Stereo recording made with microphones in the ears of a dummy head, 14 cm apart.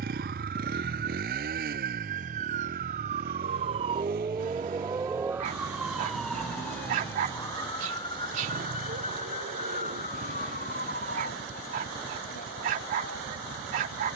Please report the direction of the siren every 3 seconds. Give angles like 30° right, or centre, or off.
60° right, 30° right, 20° left, 50° left, 60° left.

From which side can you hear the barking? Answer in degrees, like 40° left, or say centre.
60° right.